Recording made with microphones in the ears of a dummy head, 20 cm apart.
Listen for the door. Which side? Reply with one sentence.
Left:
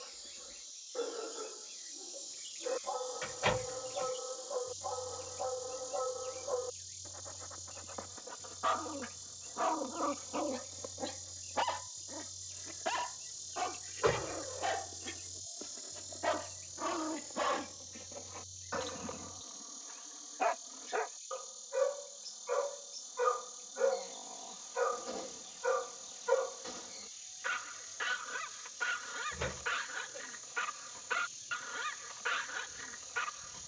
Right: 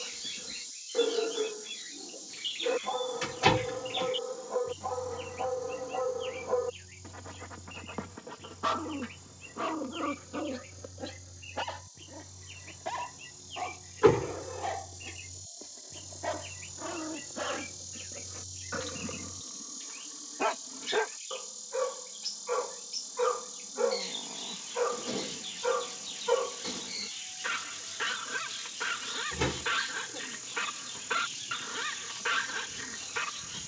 You can hear the door on the right.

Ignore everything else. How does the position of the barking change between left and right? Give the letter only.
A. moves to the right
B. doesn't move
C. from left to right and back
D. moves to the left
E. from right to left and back
E.